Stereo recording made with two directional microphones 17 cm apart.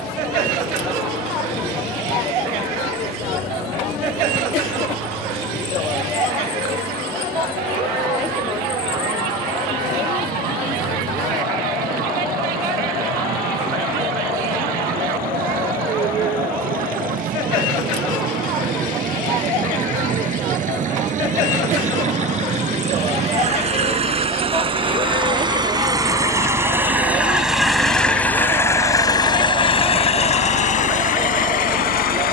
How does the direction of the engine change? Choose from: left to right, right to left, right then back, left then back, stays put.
right to left.